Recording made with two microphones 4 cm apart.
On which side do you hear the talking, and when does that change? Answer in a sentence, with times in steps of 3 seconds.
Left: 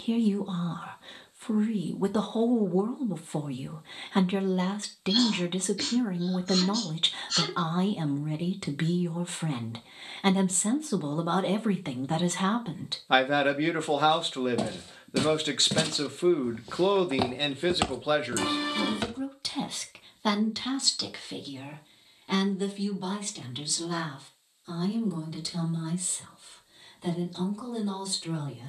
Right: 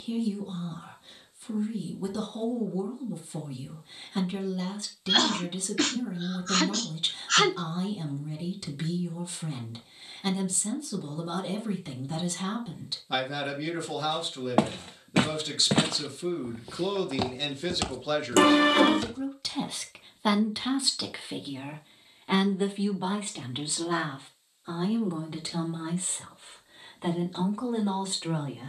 You can hear the talking on the left from 0 s, in the centre from 18 s and on the right from 21 s.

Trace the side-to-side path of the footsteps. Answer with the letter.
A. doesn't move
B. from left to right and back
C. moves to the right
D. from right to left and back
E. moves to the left
E.